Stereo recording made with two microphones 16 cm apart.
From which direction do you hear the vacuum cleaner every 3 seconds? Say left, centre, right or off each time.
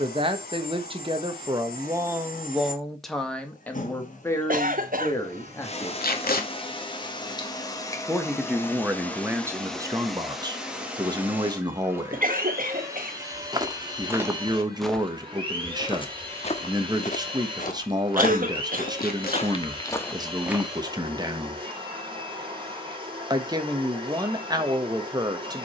left, left, left, centre, right, right, right, right, right.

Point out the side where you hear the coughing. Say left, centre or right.
right.